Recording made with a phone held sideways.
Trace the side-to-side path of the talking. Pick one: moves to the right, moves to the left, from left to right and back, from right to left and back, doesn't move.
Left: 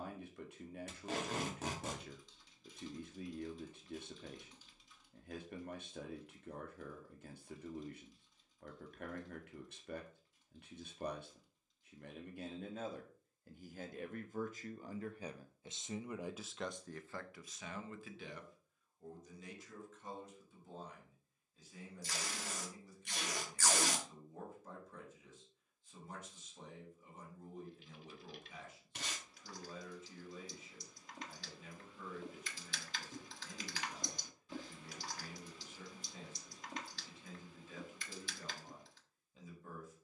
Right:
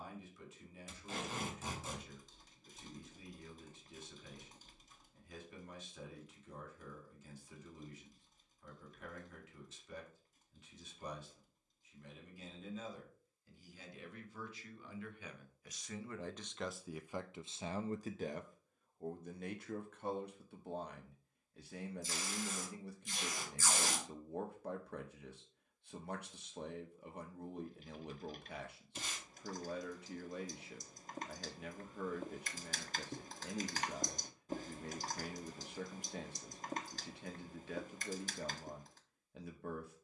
moves to the right.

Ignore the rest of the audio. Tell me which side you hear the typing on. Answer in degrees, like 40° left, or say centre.
40° right.